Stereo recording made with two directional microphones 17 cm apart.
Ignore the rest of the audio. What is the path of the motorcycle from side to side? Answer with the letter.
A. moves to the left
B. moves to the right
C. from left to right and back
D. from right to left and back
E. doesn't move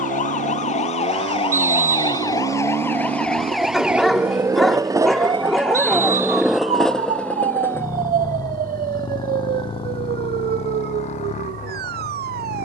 A.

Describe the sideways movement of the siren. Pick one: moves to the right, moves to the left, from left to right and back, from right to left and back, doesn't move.
moves to the right.